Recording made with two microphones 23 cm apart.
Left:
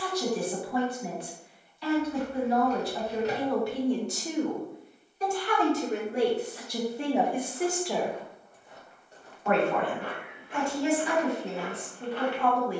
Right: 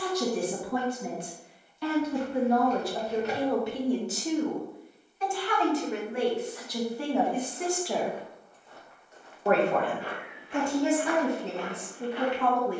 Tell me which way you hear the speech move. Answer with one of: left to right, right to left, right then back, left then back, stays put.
left then back.